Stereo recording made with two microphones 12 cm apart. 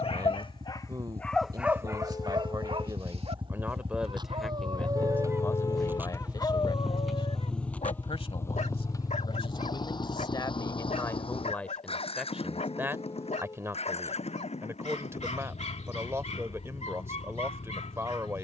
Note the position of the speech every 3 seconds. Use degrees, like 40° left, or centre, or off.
30° right, centre, 50° left, 30° left, 20° right, 20° right.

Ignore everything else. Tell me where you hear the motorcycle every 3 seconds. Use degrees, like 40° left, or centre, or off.
60° right, 40° right, 10° left, 40° left, 60° left, 70° left.